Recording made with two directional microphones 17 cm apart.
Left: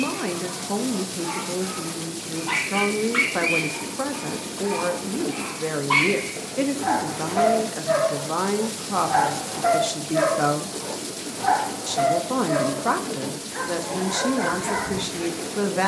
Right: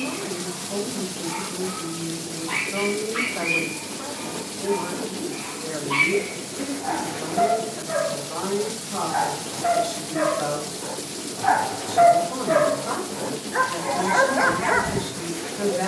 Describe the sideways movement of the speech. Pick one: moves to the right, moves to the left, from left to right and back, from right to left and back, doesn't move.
doesn't move.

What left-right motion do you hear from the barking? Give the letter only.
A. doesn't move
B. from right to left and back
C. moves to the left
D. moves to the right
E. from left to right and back
D.